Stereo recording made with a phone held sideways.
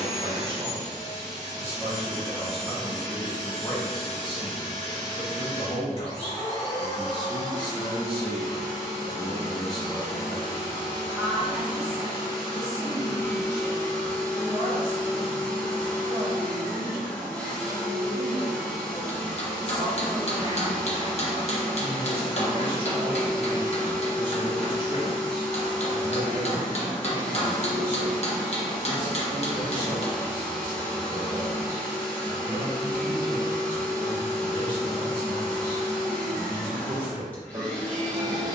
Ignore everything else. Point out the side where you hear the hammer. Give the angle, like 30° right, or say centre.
50° left.